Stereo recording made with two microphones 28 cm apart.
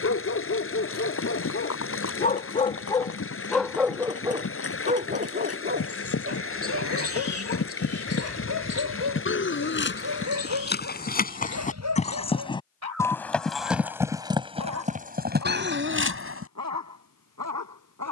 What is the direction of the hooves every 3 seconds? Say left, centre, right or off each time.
left, left, left, left, centre, right.